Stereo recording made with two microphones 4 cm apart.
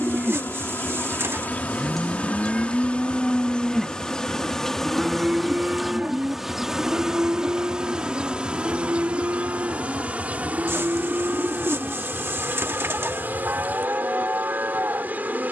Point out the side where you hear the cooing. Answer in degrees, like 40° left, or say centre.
70° right.